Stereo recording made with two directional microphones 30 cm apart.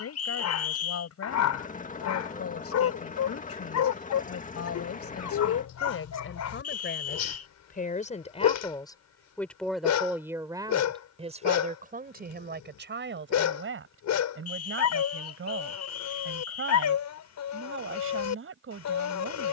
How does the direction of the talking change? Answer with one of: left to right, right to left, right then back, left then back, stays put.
left to right.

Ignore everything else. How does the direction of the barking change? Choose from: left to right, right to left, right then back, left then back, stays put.
stays put.